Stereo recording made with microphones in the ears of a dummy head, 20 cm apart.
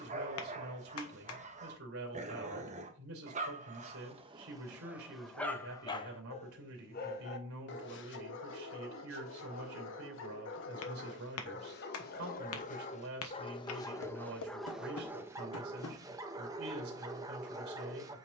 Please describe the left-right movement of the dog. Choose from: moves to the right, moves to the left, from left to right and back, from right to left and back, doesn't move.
from right to left and back.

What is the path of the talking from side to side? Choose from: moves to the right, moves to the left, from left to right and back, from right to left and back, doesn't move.
doesn't move.